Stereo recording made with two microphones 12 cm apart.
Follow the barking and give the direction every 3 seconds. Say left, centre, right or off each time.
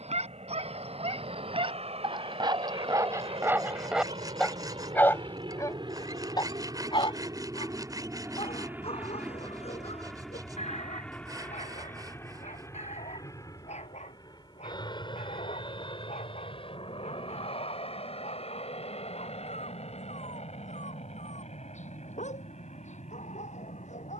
right, centre, left, left, left, left, left, left.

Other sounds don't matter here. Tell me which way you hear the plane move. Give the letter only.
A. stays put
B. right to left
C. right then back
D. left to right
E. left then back
B.